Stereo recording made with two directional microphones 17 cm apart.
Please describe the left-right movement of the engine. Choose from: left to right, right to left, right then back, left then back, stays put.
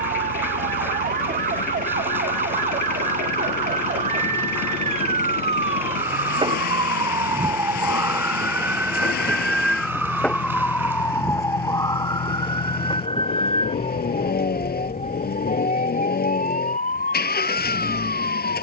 stays put.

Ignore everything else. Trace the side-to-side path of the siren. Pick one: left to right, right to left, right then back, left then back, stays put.
right to left.